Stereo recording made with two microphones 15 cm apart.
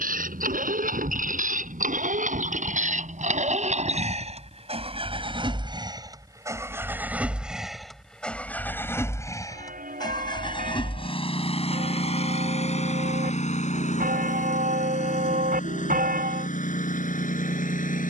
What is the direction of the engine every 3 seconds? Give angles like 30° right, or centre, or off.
60° right, 40° right, centre, 30° left, 50° left, 60° left.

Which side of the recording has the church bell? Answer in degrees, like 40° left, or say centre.
70° right.